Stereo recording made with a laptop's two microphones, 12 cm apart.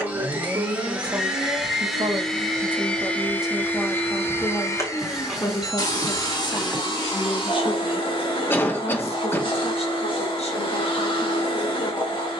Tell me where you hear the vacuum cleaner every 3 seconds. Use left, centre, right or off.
centre, left, left, left.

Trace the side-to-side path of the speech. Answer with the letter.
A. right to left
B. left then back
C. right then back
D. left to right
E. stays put
A.